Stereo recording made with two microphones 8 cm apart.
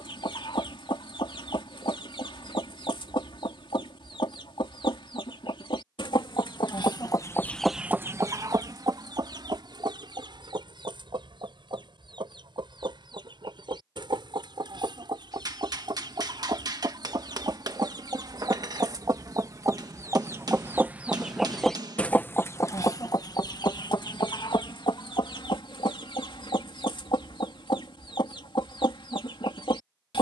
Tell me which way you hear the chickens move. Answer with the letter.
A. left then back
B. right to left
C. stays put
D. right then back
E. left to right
D.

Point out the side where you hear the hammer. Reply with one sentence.
You can hear the hammer on the right.